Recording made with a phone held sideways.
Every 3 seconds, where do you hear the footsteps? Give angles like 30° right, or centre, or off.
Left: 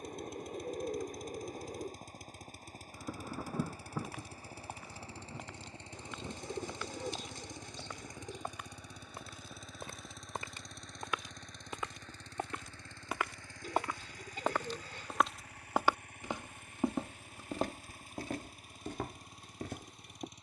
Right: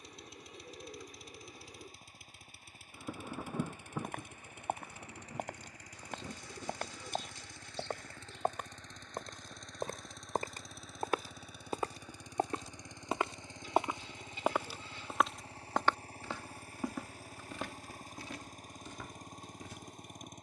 off, 60° right, 60° right, 50° right, 20° right, 20° left, 60° left.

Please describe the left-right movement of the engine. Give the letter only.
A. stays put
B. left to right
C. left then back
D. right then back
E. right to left
B.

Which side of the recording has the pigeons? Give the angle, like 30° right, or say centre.
60° left.